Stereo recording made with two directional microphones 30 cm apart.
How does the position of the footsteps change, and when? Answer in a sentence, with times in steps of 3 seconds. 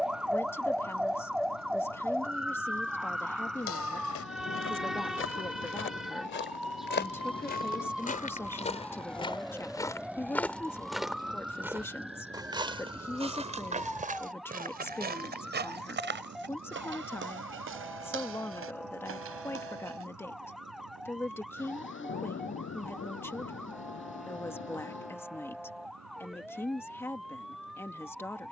You can hear the footsteps not at all from 0 s, on the left from 3 s, in the centre from 9 s, on the right from 12 s and not at all from 21 s.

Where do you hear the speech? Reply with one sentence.
In this clip you hear the speech in the centre.